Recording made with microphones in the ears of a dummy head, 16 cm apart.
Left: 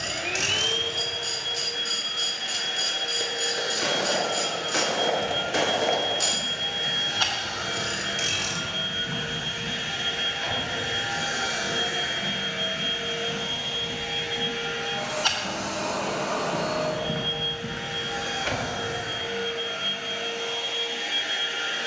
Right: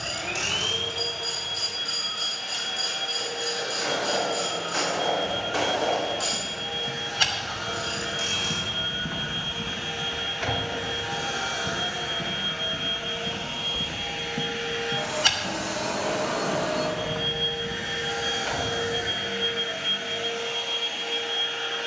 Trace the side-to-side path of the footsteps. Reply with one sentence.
In this clip you hear the footsteps move from left to right and back again.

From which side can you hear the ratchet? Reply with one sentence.
You can hear the ratchet on the left.